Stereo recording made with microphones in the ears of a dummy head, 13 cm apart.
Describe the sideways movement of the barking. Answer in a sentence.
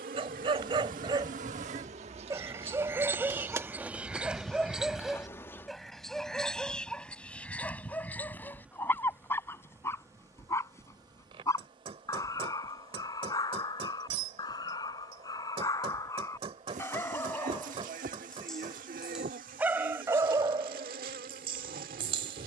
In this clip you hear the barking move from right to left and back again.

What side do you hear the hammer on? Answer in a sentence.
In this clip you hear the hammer on the right.